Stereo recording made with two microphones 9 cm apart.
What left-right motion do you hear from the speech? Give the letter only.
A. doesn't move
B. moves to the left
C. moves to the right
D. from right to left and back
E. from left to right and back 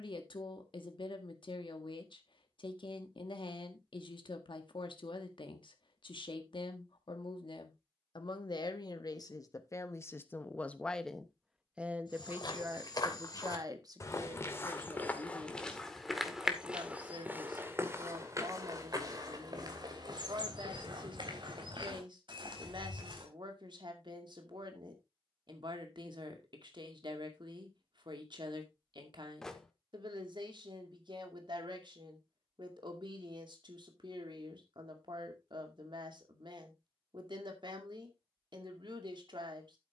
C.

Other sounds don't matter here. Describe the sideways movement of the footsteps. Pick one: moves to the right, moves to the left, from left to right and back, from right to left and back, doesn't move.
moves to the right.